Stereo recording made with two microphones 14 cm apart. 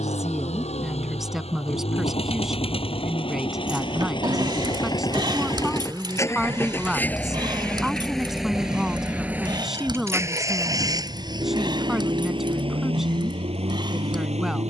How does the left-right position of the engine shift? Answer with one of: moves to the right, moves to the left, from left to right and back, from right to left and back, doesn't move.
moves to the right.